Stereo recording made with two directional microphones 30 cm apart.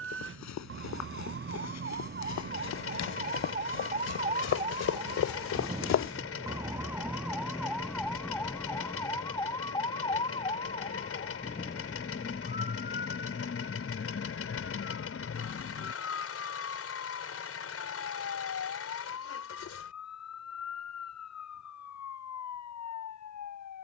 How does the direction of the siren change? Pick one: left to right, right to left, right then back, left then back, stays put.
right to left.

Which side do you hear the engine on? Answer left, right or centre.
left.